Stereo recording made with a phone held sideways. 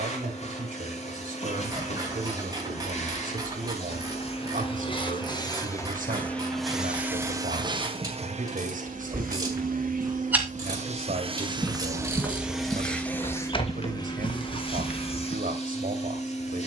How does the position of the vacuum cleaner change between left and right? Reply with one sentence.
You can hear the vacuum cleaner move from left to right and back again.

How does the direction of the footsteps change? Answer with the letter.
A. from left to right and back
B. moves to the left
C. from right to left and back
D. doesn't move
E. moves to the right
B.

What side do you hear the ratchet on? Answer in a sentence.
In this clip you hear the ratchet on the right.